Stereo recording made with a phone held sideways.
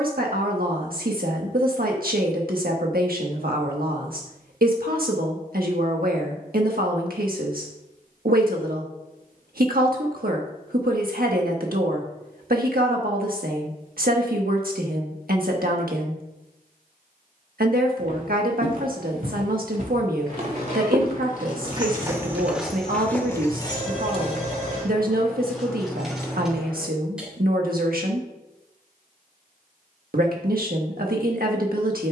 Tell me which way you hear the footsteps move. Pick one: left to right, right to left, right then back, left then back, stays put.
right to left.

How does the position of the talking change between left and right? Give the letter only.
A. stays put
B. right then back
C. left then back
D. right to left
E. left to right
A.